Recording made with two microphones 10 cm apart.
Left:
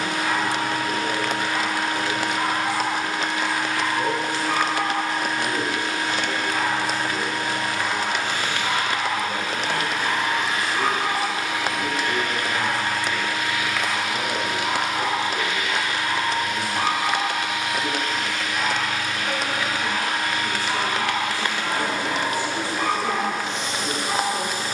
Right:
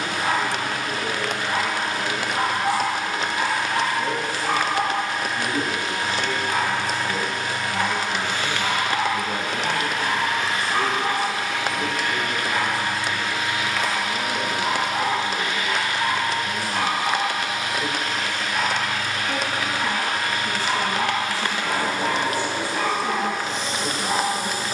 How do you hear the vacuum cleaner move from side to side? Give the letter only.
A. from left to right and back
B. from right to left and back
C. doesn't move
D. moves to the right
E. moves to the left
D.